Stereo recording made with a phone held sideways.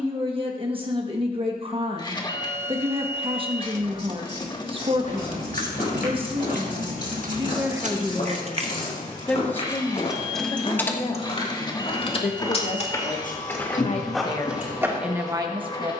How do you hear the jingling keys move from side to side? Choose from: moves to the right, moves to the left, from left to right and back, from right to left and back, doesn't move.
moves to the left.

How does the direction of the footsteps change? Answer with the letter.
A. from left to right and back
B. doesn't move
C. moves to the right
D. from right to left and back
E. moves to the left
C.